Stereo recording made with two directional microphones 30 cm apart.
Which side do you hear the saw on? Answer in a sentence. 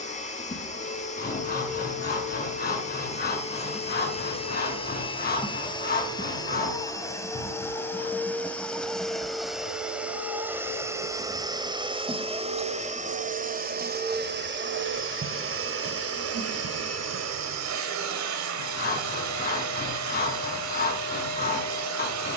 You can hear the saw on the left.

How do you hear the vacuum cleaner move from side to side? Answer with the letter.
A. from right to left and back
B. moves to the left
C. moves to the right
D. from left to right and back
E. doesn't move
C.